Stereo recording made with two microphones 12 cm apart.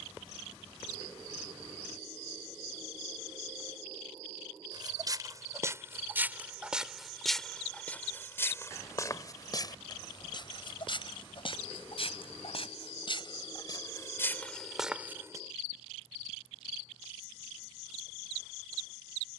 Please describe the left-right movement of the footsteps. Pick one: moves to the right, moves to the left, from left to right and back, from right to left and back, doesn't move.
from right to left and back.